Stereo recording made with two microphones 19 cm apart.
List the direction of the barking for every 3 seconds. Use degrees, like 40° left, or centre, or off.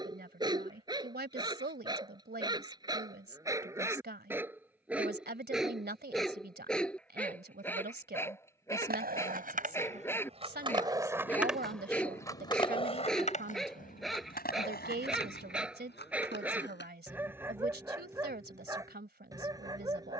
20° right, 10° right, 10° left, 10° left, centre, 10° right, 20° right.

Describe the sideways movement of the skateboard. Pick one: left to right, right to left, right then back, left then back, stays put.
right to left.